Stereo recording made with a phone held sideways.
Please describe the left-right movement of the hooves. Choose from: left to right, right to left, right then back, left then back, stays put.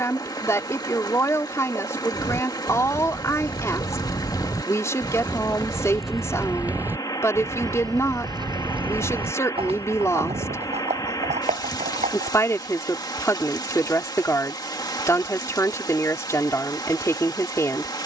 left to right.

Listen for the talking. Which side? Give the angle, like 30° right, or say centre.
20° left.